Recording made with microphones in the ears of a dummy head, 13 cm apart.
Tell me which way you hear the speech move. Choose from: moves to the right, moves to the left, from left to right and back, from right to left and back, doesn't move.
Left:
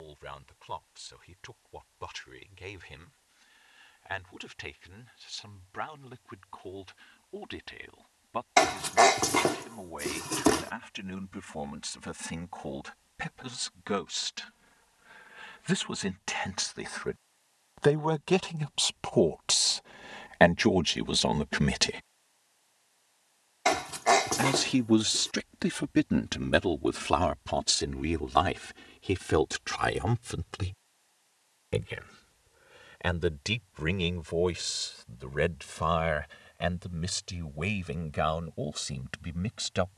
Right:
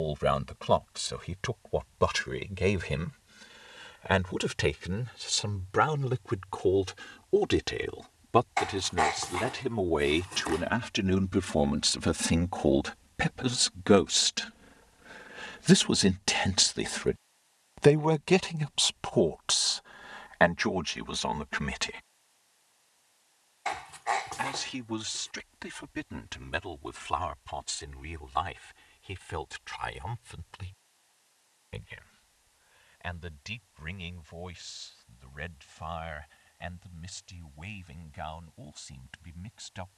moves to the left.